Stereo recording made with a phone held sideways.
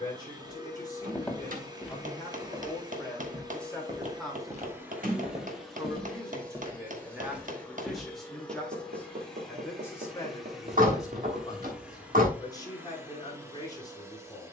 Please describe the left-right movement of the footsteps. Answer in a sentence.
You can hear the footsteps go right and come back.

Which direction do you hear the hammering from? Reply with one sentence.
You can hear the hammering on the right.